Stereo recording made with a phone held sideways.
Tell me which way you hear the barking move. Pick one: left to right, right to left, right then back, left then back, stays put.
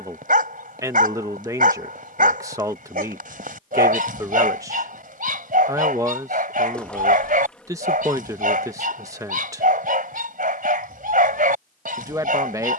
stays put.